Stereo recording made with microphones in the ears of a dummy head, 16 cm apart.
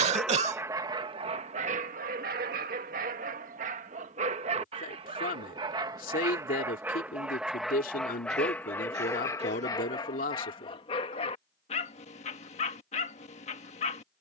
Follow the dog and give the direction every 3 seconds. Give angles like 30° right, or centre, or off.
30° right, 40° right, centre, 30° left, 40° left.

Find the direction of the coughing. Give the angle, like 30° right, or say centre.
40° right.